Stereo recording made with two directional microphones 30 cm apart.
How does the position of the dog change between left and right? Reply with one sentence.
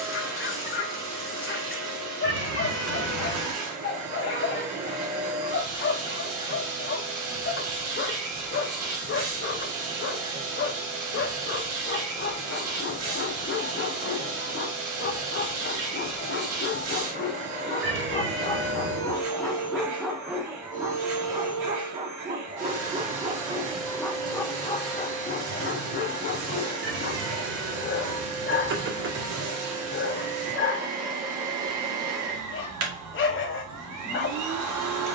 You can hear the dog move from left to right and back again.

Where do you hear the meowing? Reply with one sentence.
In this clip you hear the meowing on the right.